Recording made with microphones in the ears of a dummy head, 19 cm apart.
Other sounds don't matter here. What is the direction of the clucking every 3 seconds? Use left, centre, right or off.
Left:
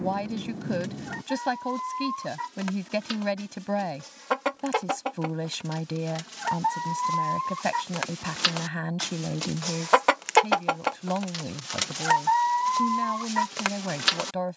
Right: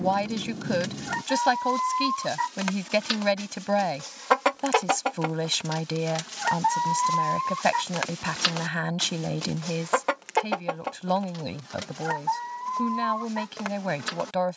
right, right, centre, left, left.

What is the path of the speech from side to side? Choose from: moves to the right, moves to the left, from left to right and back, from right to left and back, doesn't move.
doesn't move.